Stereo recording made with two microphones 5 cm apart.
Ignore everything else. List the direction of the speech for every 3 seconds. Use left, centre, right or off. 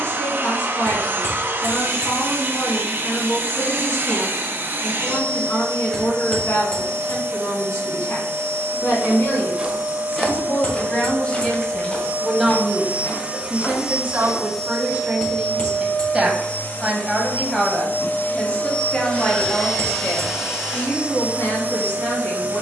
left, left, left, left, right, centre, left, left.